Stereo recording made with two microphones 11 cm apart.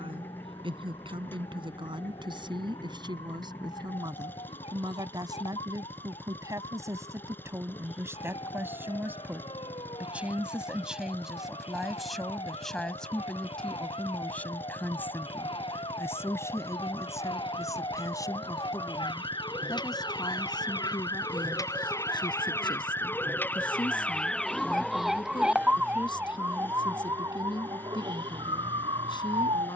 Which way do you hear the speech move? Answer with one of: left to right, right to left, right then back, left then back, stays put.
right to left.